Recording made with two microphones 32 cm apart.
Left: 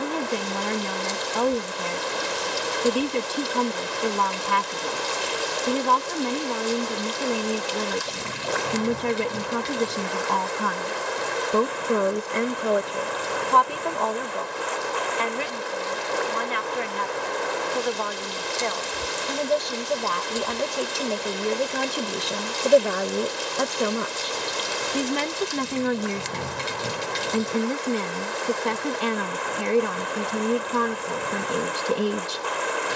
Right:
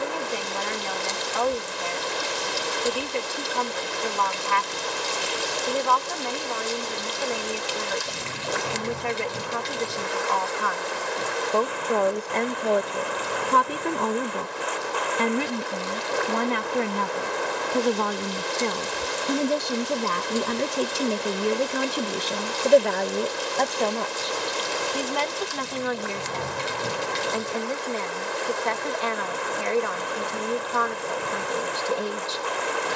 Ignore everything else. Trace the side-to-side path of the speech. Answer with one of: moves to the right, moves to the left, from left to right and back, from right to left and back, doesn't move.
from left to right and back.